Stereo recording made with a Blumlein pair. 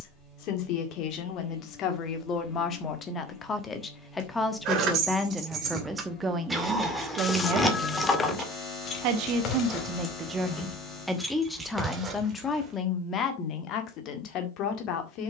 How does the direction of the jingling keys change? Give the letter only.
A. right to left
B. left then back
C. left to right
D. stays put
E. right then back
B.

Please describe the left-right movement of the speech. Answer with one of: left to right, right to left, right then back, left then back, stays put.
right then back.